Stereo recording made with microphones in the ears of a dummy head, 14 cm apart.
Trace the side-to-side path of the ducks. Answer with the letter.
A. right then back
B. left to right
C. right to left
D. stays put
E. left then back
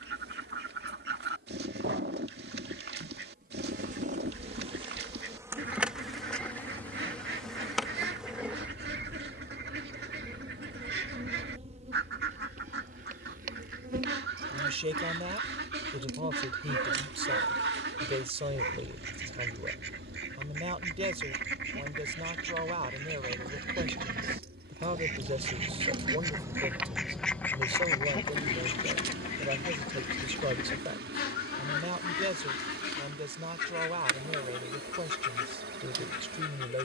C.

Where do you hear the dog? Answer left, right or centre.
right.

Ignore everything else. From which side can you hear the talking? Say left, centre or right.
right.